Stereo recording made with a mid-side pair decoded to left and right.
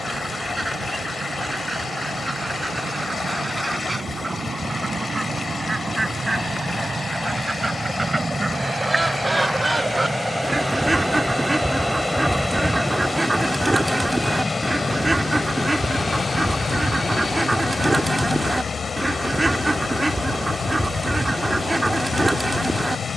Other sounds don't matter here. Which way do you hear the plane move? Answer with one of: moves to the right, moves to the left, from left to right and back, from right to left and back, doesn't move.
moves to the left.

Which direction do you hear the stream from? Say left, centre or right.
left.